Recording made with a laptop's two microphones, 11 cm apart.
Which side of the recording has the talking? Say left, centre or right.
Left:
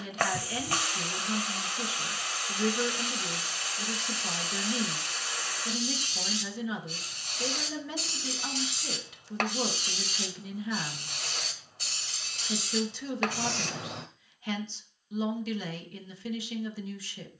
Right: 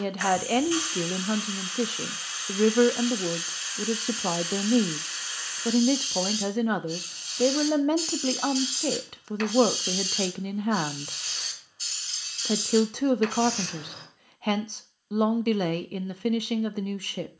right.